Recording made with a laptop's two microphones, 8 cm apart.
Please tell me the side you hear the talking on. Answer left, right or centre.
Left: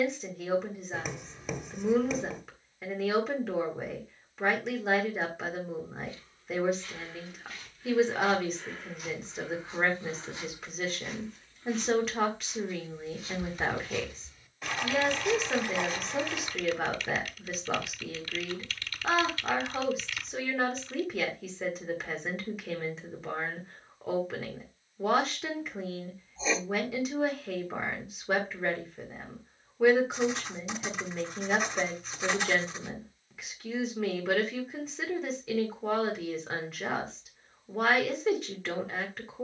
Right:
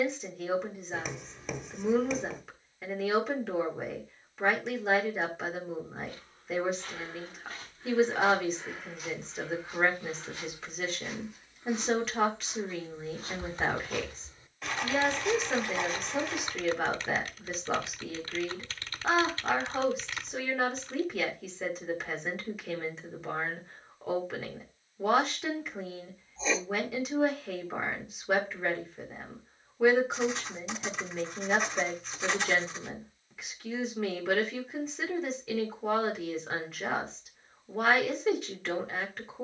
centre.